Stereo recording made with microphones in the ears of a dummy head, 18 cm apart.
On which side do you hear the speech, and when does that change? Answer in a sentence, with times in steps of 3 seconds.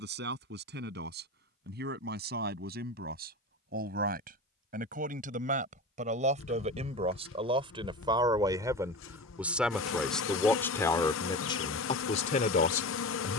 In this clip you hear the speech on the right from 0 s, in the centre from 9 s and on the left from 12 s.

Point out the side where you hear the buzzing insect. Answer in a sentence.
In this clip you hear the buzzing insect on the left.